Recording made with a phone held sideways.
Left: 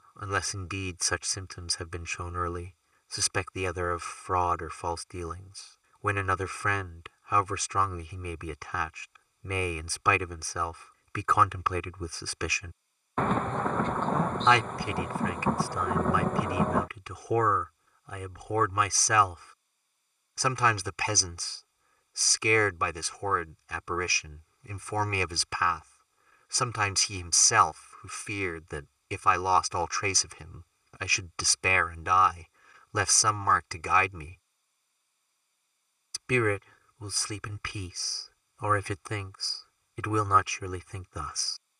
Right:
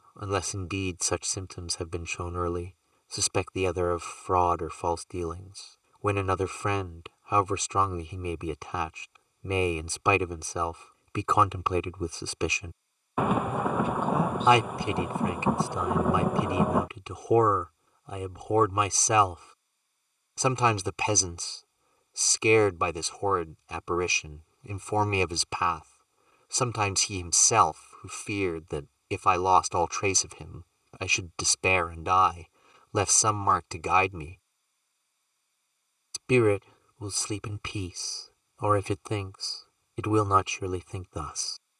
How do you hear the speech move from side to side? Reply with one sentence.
In this clip you hear the speech stay put.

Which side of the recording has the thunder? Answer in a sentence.
You can hear the thunder in the centre.